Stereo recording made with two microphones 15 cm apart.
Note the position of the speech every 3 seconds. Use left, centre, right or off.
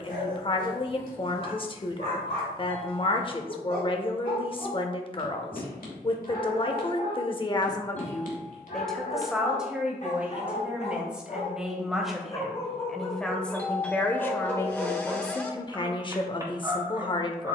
left, left, left, centre, centre, left.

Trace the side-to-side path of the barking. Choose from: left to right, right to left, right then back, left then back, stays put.
left to right.